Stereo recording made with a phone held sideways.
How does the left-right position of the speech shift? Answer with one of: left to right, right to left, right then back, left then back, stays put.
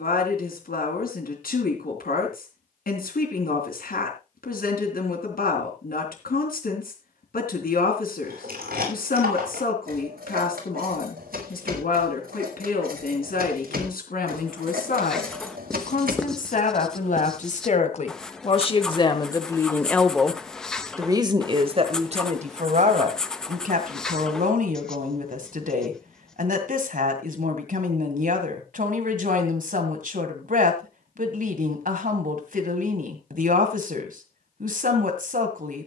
left to right.